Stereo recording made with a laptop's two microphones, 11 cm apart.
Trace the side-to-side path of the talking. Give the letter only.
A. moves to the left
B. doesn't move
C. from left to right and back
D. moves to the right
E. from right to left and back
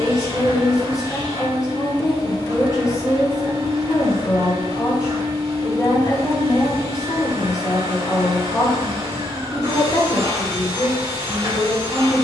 B.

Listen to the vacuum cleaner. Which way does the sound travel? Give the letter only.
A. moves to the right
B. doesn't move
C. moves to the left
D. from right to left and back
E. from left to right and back
B.